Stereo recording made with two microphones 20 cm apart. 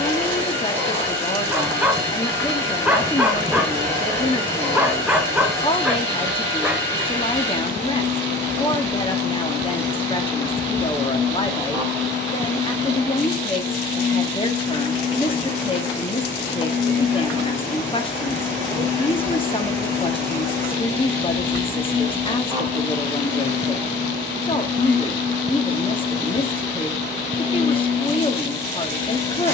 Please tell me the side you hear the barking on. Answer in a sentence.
You can hear the barking in the centre.